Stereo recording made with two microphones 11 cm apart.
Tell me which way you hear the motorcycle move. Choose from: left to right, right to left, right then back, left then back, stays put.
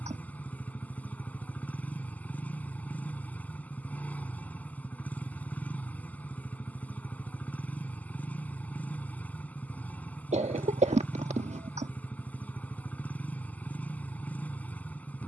stays put.